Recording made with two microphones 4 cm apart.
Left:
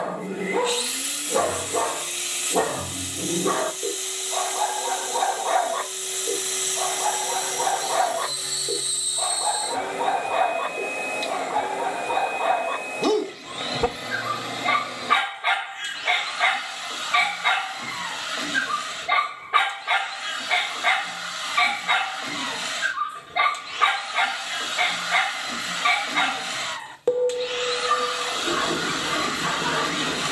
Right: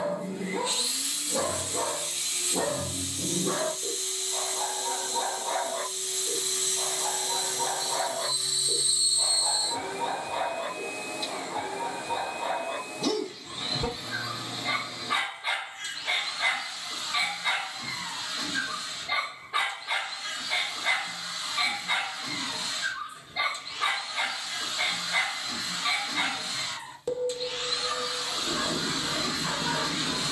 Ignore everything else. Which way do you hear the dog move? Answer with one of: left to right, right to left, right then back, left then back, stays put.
stays put.